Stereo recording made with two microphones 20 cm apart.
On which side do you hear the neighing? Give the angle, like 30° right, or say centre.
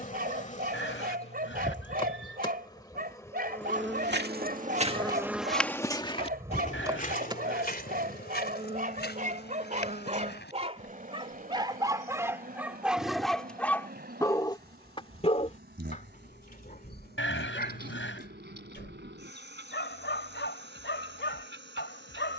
70° left.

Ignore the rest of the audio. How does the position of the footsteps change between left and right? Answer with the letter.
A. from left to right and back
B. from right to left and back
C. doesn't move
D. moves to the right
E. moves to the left
E.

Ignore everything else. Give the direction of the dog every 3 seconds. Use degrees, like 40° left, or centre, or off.
50° right, 50° right, 50° right, 30° right, centre, 50° left, 60° left, 70° left.